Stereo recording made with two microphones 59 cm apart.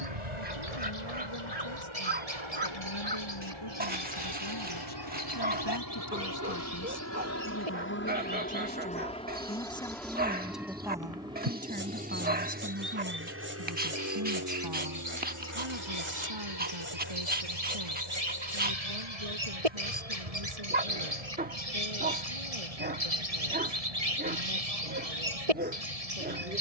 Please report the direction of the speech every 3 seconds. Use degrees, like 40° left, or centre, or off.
50° left, 50° left, 30° left, centre, 30° right, 50° right, 70° right, 70° right, 80° right.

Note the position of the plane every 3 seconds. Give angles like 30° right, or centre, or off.
60° left, 40° left, 20° left, centre, 20° right, 30° right, 40° right, 50° right, 50° right.